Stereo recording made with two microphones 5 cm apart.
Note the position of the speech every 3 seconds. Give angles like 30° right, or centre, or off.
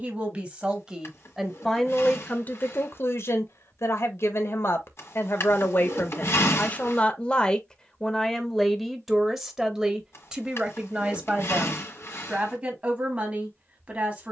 centre, 50° left, 20° left, 20° right, 30° right.